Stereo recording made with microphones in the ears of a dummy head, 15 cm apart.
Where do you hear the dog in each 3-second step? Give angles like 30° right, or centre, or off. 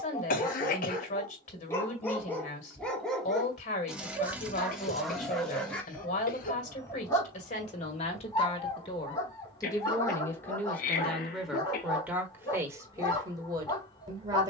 20° left, centre, 20° left, 20° left, 20° left.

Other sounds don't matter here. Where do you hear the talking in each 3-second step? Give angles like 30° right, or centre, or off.
50° left, 50° left, 40° left, 10° left, 20° right.